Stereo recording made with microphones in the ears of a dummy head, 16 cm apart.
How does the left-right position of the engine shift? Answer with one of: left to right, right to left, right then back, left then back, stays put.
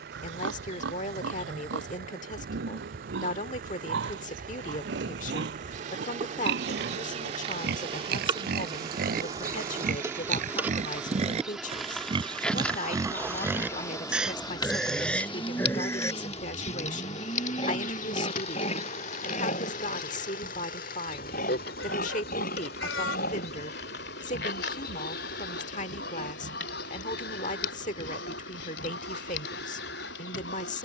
right to left.